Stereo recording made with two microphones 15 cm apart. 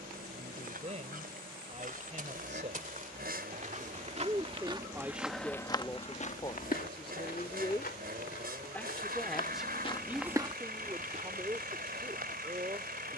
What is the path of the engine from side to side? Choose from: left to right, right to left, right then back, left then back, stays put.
stays put.